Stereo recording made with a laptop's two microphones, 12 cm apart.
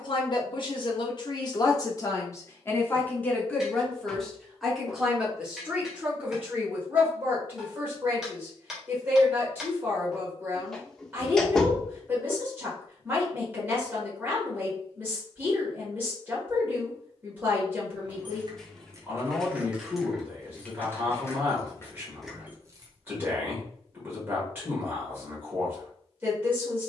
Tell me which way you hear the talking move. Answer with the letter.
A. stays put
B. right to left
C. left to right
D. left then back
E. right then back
C.